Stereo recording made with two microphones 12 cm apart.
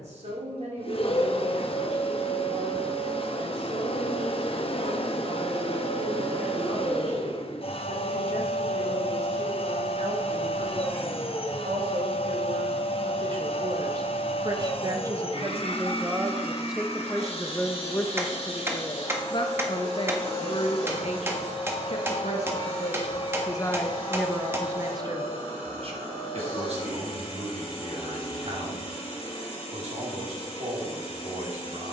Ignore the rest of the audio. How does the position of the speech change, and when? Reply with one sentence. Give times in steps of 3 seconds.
You can hear the speech on the right from 0 s, in the centre from 15 s, on the left from 18 s and on the right from 24 s.